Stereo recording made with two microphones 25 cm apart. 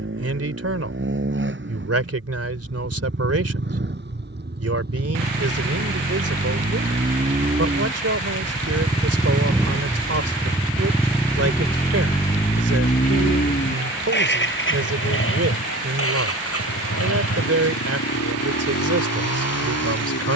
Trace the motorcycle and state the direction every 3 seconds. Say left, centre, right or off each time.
right, right, right, centre, left, left, left.